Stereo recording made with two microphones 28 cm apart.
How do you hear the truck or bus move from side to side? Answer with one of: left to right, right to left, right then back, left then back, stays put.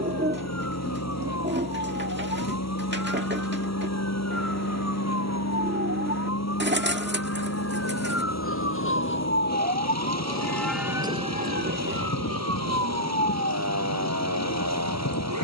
stays put.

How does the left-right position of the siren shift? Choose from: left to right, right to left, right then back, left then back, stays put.
left to right.